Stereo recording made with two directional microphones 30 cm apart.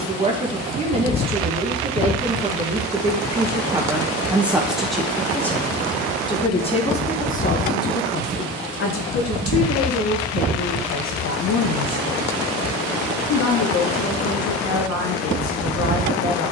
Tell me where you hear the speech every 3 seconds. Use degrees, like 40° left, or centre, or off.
20° right, centre, 30° left, 60° left, 70° left, 70° left.